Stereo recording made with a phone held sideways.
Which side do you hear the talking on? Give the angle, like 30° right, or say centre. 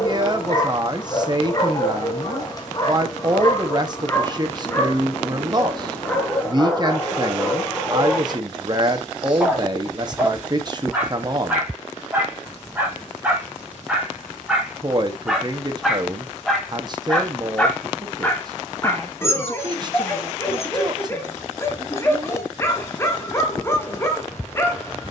30° right.